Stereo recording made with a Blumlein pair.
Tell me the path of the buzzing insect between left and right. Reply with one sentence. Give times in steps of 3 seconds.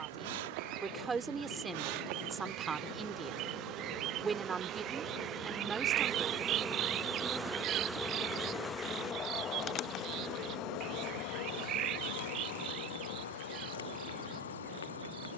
In this clip you hear the buzzing insect on the right from 0 s, in the centre from 6 s and on the left from 9 s.